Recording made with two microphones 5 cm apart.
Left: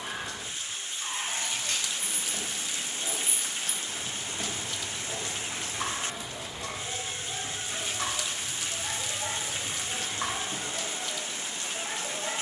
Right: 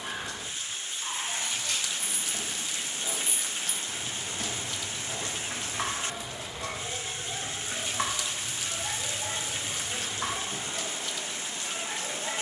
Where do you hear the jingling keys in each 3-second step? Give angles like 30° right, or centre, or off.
40° left, 20° right, 50° right, 30° left.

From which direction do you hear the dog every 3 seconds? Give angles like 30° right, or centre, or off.
50° left, 20° left, 10° right, 50° left.